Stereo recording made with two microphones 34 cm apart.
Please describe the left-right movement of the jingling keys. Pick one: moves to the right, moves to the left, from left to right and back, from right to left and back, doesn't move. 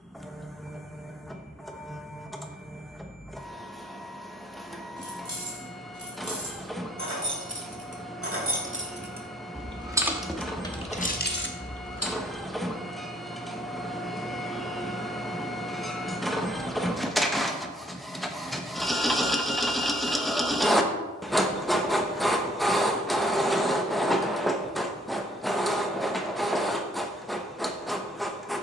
moves to the left.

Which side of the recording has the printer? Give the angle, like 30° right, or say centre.
centre.